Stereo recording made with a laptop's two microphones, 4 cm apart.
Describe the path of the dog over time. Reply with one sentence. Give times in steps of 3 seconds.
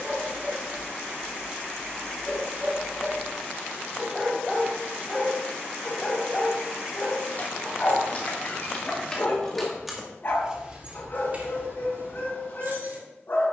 You can hear the dog on the right from 0 s, in the centre from 3 s and on the left from 6 s.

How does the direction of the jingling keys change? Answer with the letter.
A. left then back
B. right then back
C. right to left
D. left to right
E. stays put
D.